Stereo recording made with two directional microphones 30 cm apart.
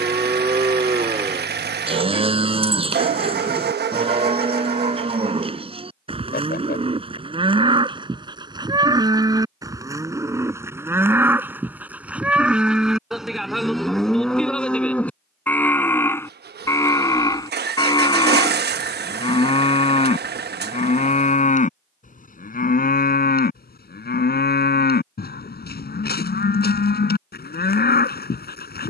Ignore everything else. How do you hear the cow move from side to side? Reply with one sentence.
You can hear the cow travel towards the left.